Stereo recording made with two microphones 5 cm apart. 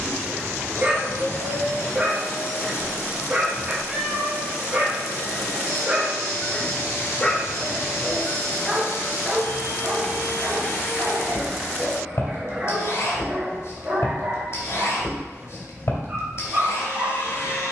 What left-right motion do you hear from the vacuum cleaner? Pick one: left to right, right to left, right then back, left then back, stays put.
stays put.